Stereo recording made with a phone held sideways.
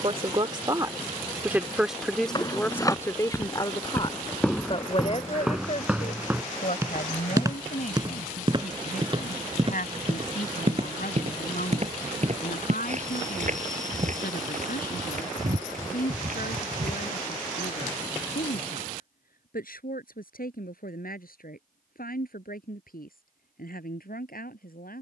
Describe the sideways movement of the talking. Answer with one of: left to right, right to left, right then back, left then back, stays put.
right to left.